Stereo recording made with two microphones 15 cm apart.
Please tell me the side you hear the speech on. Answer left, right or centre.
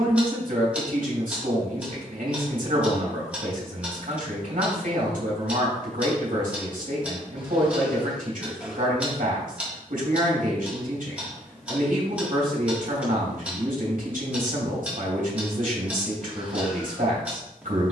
right.